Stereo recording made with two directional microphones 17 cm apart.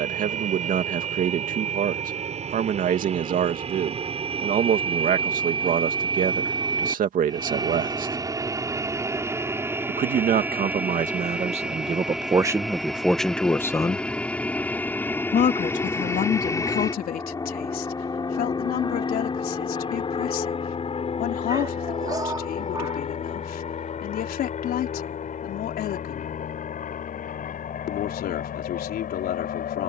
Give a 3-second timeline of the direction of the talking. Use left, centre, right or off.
right, right, right, right, centre, left, left, left, left, left.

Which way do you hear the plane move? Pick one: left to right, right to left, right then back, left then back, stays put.
right to left.